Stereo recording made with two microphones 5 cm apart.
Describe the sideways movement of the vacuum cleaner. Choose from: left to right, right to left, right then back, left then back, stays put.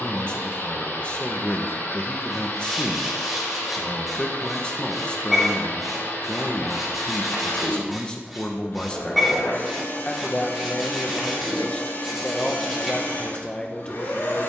stays put.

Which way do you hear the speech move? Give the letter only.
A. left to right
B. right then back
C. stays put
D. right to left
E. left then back
C.